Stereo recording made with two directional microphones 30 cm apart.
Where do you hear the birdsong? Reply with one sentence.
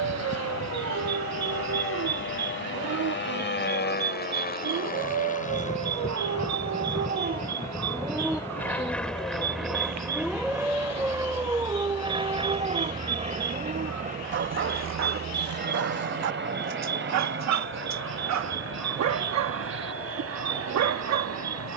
You can hear the birdsong on the right.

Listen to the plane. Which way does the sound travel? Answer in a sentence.
You can hear the plane travel towards the right.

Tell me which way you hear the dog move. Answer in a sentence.
You can hear the dog go left and come back.